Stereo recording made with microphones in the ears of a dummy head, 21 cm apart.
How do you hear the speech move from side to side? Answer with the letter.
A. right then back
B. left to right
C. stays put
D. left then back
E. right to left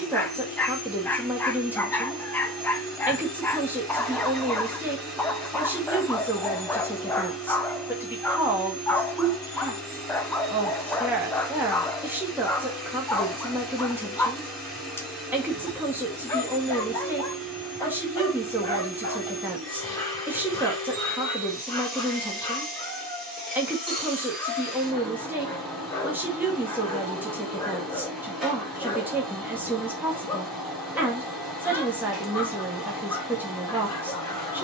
C.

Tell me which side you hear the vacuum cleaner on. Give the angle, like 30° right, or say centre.
centre.